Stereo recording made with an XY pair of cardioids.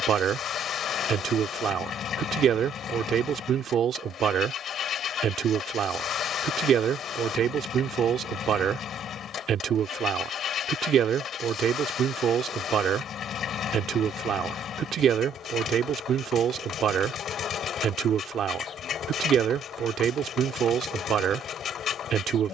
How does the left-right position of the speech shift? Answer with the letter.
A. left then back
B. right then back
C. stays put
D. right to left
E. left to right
C.